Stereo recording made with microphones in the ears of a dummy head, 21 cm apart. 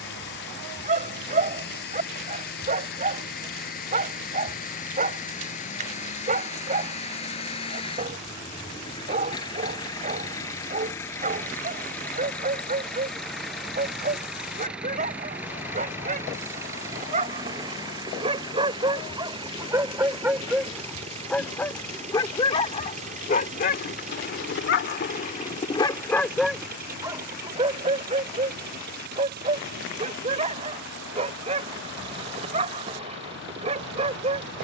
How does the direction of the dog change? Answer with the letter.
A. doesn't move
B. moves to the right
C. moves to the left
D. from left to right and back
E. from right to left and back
E.